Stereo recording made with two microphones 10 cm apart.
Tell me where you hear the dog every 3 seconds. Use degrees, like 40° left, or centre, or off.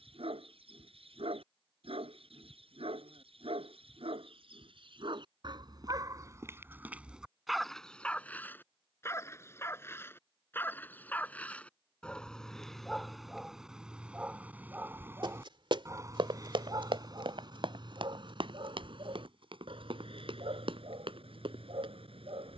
70° right, 60° right, 10° right, 20° left, centre, 40° right, 60° right, 70° right.